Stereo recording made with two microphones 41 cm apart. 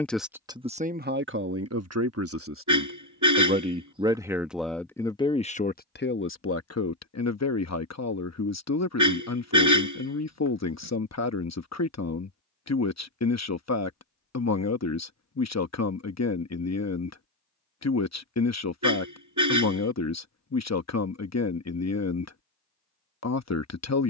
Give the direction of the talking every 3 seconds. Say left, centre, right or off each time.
right, centre, left, left, left, left, left, left.